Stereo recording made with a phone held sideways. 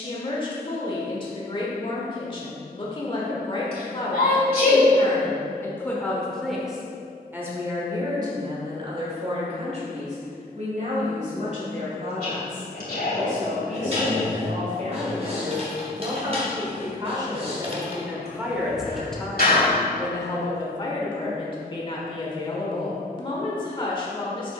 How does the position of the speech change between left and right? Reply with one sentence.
You can hear the speech go right and come back.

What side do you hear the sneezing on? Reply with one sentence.
You can hear the sneezing on the left.